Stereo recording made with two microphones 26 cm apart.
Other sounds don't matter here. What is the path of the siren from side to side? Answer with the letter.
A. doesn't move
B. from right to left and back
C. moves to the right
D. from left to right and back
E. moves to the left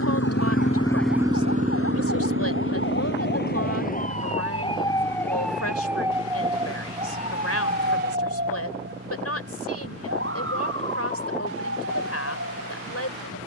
C.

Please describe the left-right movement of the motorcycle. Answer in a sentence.
You can hear the motorcycle travel towards the right.